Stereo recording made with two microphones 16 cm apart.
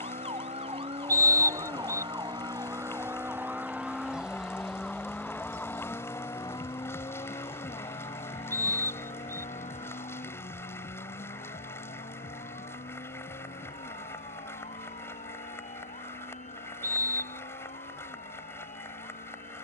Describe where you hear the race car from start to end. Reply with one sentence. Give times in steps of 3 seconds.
You can hear the race car on the right from 0 s, in the centre from 3 s and on the left from 6 s.